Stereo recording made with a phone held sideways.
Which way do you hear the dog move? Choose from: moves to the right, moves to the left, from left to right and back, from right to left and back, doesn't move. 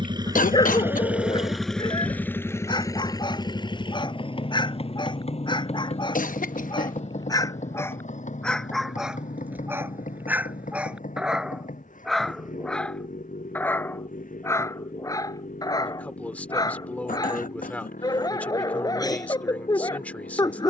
from left to right and back.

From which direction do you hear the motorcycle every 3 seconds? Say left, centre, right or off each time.
centre, left, left, left, left, left, left.